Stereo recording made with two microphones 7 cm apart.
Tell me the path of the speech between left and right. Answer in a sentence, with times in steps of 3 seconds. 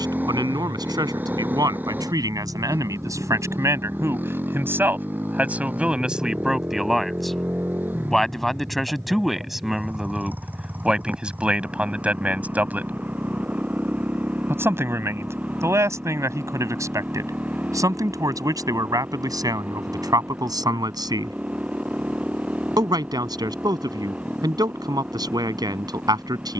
In this clip you hear the speech on the right from 0 s, in the centre from 6 s and on the right from 12 s.